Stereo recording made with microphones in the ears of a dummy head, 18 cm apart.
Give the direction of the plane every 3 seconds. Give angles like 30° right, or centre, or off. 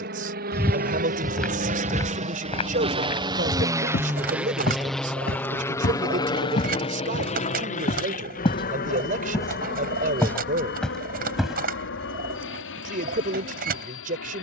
40° right, centre, 30° left, 50° left, 60° left.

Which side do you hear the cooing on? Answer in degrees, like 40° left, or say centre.
50° right.